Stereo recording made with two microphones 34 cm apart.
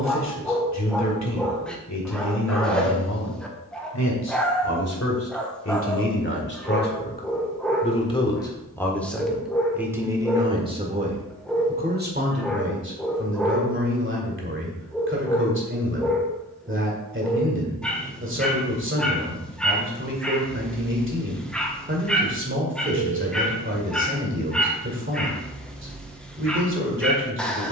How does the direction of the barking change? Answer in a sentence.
You can hear the barking stay put.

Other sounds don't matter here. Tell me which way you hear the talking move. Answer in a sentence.
In this clip you hear the talking travel towards the right.